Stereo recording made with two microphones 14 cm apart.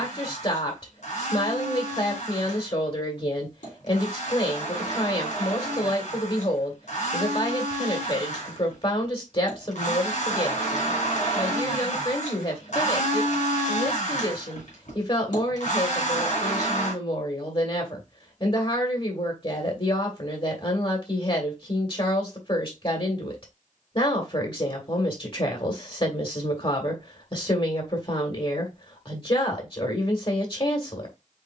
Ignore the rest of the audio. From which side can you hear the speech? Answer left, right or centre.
left.